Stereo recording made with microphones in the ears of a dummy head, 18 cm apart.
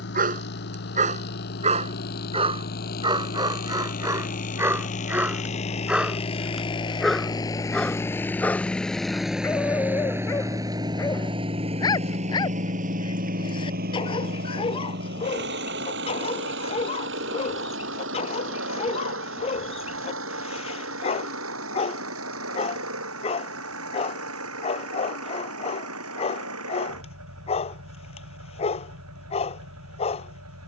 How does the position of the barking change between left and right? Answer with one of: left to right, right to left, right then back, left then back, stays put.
right to left.